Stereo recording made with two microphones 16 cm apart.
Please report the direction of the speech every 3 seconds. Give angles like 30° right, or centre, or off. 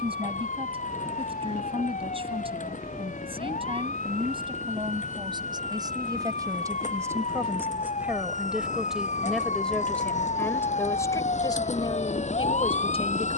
40° right, 30° right, 10° right, 10° left, 40° left.